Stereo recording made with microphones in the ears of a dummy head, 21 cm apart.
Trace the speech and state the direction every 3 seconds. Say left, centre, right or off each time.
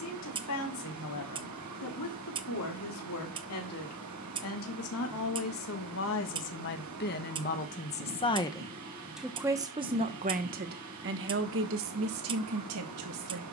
left, left, left, right, right.